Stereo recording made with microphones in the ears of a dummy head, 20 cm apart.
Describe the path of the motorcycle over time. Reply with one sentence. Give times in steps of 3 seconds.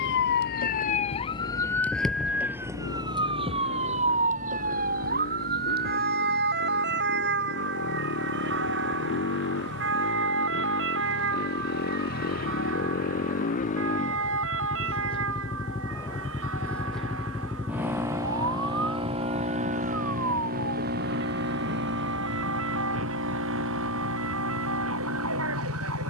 You can hear the motorcycle on the left from 0 s, in the centre from 15 s and on the right from 18 s.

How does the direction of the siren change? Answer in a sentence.
You can hear the siren move from left to right.